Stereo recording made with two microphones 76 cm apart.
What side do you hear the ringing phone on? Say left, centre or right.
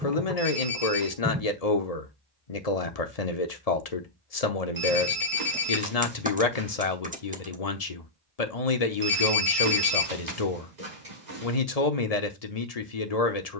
right.